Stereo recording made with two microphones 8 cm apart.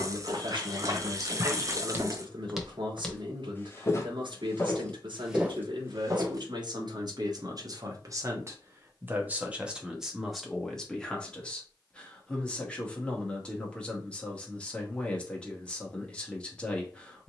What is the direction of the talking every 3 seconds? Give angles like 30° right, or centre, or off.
70° right, 70° right, 50° right, centre, 10° left, 10° left.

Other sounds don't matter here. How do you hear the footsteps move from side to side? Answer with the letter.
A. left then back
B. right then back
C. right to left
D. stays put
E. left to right
A.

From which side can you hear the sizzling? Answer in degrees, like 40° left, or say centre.
40° right.